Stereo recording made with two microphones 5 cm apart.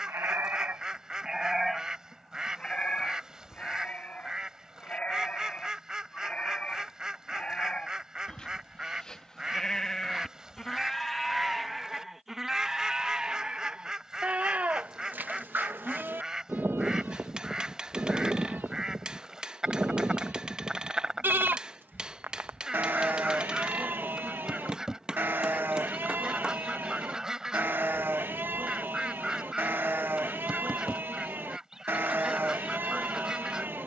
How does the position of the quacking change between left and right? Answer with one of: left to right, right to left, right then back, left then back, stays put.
stays put.